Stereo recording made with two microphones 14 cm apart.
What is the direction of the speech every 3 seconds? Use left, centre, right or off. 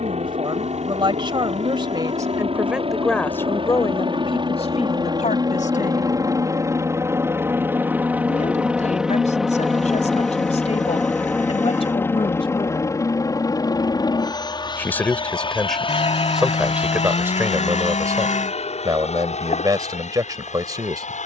right, left, left, left, left, centre, right.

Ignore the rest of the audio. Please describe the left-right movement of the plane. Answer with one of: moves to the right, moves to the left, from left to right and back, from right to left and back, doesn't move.
moves to the left.